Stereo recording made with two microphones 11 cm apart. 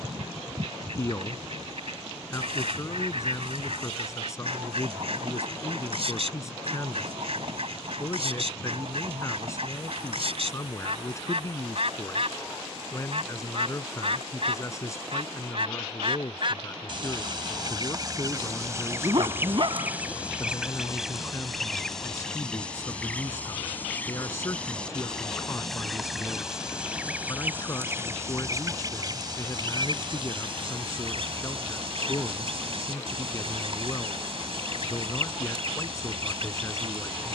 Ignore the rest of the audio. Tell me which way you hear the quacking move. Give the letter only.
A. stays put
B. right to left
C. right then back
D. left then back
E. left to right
D.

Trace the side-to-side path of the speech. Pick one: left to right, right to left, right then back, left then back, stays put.
stays put.